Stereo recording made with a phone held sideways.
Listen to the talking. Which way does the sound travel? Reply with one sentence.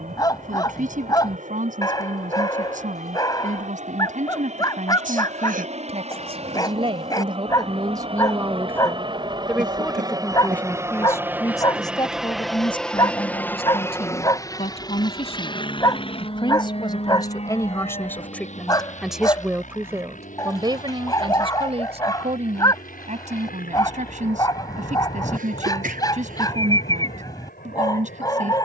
In this clip you hear the talking move from right to left and back again.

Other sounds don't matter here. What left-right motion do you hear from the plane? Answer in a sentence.
You can hear the plane travel towards the left.